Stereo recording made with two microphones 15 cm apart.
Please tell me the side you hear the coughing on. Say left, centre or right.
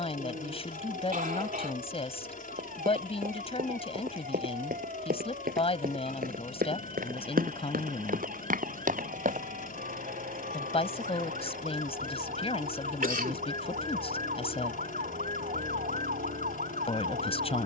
right.